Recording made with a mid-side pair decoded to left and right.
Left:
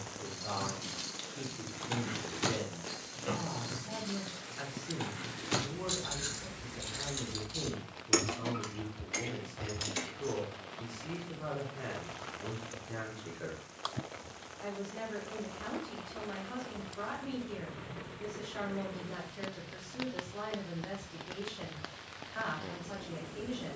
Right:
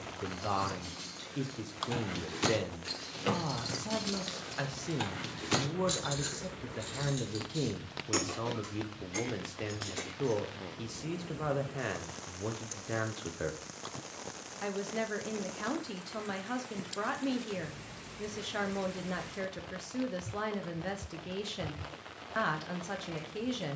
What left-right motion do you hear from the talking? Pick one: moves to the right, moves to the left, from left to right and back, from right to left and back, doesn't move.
doesn't move.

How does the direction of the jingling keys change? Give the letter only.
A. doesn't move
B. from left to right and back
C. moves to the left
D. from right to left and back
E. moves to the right
B.